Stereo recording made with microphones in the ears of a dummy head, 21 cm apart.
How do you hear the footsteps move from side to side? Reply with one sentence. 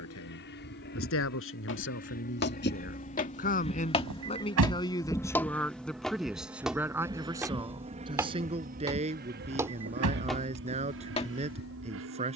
You can hear the footsteps move from left to right and back again.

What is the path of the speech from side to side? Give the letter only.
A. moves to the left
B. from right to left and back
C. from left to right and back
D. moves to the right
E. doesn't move
D.